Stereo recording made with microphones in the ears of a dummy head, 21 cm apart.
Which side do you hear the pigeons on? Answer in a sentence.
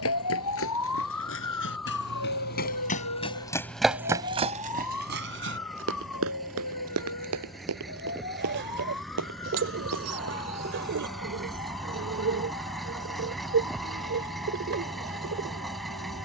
You can hear the pigeons on the right.